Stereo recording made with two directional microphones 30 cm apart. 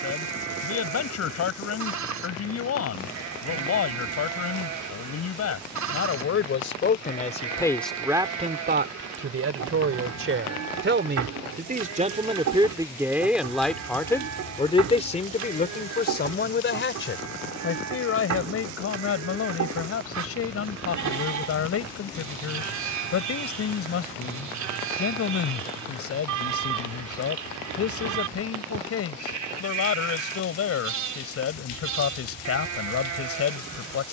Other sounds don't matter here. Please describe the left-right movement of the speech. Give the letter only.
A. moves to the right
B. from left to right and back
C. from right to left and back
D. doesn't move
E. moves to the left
B.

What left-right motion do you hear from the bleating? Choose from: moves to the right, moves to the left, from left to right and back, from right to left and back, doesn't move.
doesn't move.